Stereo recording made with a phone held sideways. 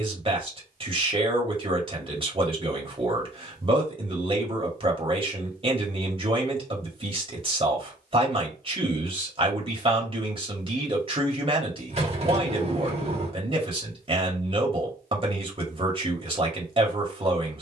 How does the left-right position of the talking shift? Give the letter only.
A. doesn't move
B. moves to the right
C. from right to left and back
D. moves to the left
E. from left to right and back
A.